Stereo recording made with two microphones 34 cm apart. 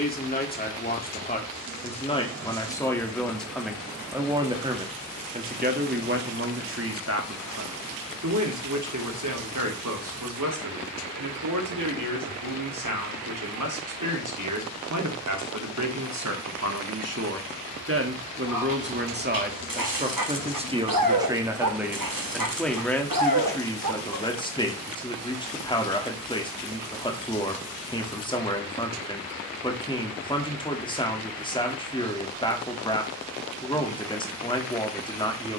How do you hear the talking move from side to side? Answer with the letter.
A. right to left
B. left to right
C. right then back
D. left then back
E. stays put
C.